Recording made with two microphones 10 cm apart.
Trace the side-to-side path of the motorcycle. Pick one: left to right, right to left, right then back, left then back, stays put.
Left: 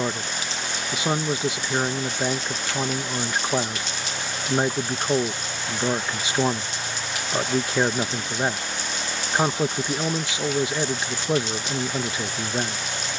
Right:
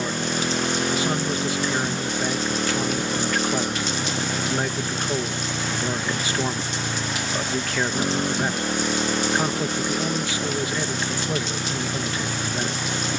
stays put.